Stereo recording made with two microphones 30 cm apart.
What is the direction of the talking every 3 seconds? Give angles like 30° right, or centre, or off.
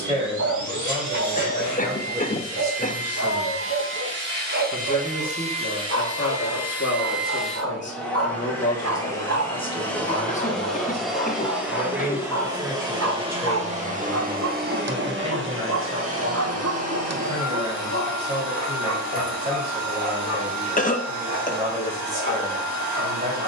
20° right, 20° left, 40° left, 10° left, 10° right, 20° right, 20° right, 20° right.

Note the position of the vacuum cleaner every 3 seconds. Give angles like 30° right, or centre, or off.
70° right, 30° right, centre, centre, 20° right, 50° right, 70° right, 70° right.